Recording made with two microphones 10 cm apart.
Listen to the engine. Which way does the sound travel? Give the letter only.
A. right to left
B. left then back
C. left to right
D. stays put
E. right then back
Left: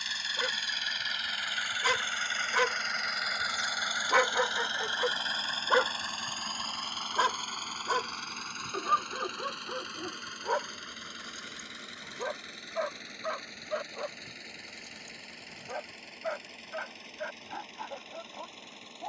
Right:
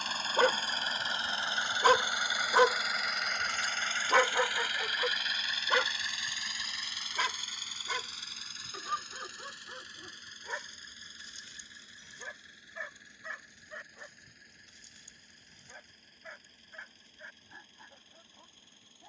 A.